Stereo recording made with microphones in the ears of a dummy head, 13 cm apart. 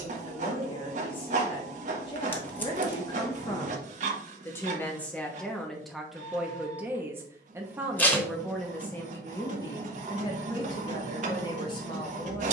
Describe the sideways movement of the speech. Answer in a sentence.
You can hear the speech move from left to right and back again.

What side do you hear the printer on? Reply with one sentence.
You can hear the printer on the right.